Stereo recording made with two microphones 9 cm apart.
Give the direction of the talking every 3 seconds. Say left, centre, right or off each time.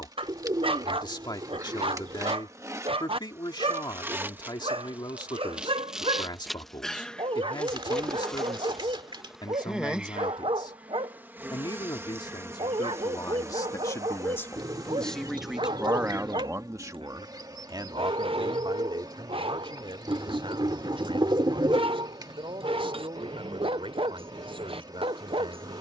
left, left, left, left, left, right, right, right, right.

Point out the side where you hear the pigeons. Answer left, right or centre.
right.